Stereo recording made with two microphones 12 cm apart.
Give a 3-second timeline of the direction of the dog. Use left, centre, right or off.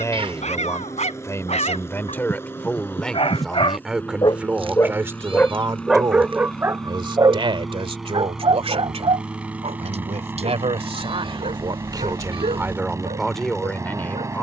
left, left, right, right, right.